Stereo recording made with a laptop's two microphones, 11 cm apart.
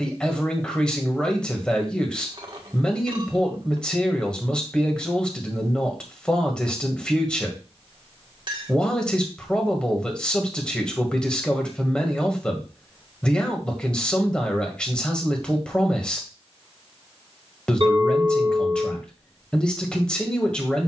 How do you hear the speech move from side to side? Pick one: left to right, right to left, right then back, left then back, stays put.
stays put.